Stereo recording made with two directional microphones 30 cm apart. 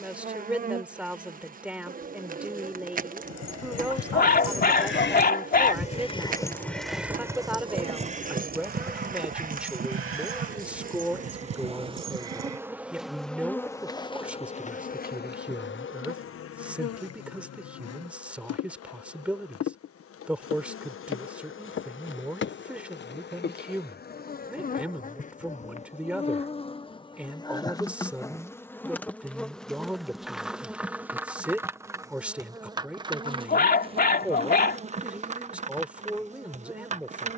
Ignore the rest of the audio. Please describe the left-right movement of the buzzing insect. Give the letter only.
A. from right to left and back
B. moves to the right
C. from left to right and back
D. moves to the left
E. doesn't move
A.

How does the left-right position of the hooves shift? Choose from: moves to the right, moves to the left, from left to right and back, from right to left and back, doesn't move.
moves to the right.